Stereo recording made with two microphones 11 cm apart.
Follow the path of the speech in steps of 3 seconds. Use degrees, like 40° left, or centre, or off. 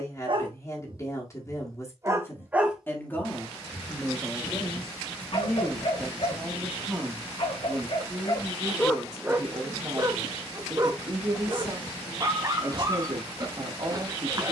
30° left, 10° left, 20° right, 40° right, 50° right.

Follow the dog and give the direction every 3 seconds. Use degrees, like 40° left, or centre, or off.
30° right, 40° left, 50° left, 30° right, 30° right.